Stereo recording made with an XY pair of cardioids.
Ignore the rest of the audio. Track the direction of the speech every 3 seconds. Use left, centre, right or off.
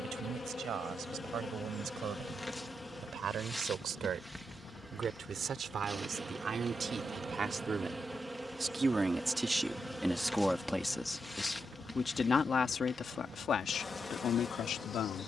right, right, right, centre, left.